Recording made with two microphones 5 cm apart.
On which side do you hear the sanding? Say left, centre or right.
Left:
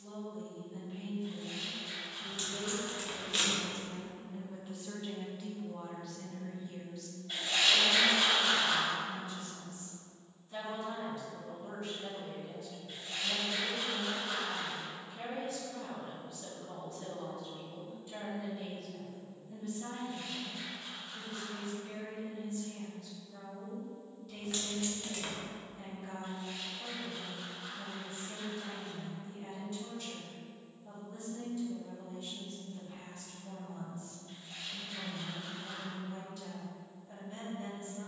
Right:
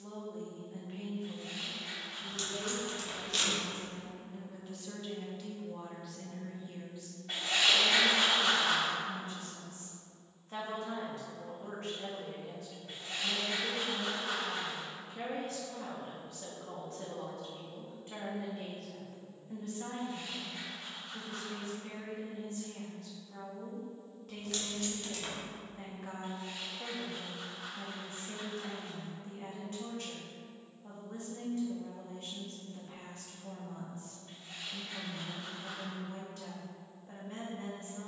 right.